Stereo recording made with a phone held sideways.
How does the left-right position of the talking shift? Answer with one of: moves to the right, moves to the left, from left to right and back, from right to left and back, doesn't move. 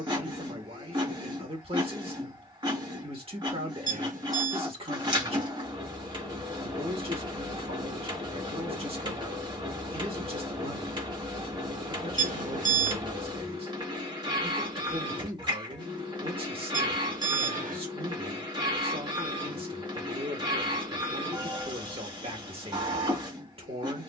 doesn't move.